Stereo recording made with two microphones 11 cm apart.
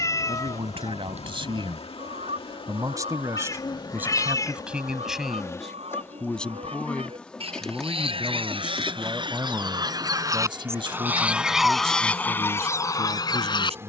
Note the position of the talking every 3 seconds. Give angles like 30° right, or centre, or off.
50° right, 10° right, centre, 40° right, 70° right.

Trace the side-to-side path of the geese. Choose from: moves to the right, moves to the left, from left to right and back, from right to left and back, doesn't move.
moves to the left.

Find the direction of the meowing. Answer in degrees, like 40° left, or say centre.
30° left.